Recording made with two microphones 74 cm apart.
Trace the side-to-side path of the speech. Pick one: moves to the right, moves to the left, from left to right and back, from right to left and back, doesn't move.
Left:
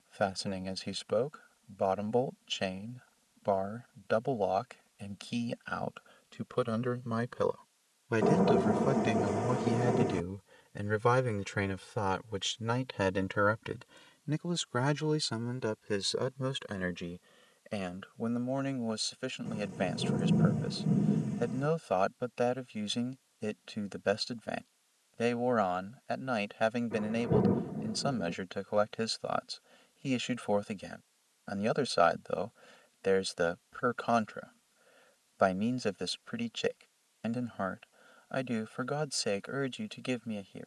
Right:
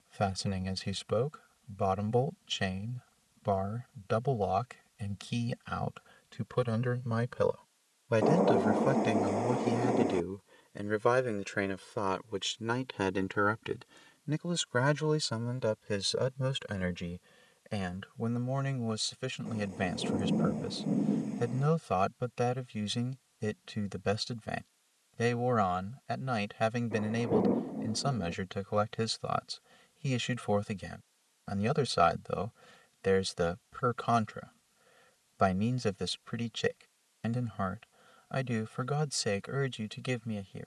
from right to left and back.